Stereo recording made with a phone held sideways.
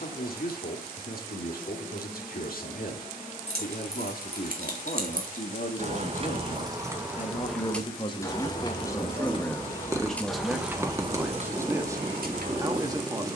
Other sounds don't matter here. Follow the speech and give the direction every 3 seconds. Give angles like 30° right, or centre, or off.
70° left, 60° left, 40° left, centre, 20° right.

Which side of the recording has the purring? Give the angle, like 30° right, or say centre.
20° right.